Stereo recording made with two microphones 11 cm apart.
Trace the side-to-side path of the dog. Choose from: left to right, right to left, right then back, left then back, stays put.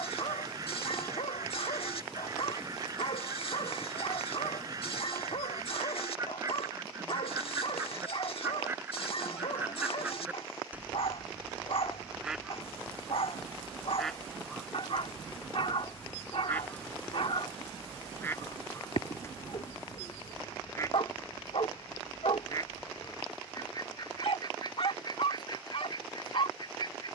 stays put.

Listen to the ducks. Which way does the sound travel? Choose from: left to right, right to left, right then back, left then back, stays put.
right to left.